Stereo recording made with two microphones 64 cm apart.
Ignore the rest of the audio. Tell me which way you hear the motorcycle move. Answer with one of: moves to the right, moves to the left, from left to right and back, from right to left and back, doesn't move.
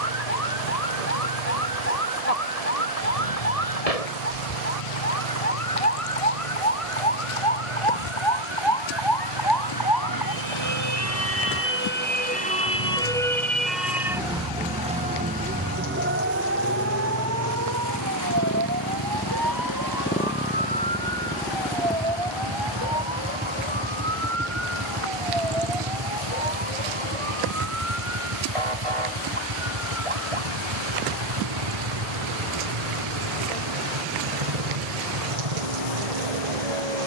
moves to the right.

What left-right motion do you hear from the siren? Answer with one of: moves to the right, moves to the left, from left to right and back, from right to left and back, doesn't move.
moves to the right.